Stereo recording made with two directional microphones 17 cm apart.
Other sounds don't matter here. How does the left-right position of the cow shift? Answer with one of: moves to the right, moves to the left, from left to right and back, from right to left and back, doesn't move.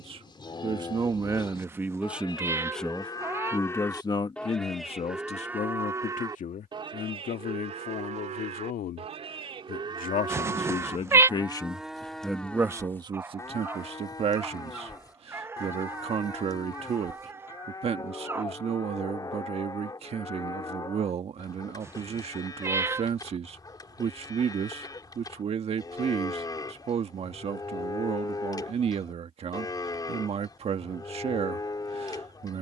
from left to right and back.